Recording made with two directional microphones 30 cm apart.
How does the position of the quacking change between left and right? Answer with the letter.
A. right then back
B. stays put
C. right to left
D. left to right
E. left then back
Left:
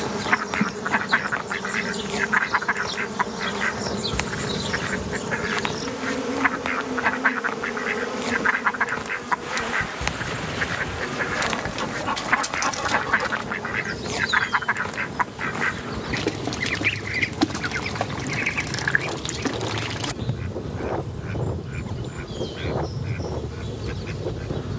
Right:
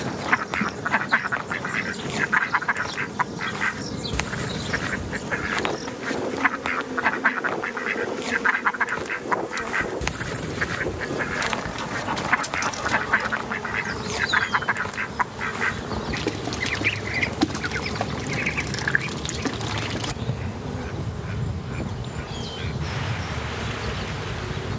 B.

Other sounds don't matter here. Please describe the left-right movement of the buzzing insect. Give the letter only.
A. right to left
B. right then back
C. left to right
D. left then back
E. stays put
C.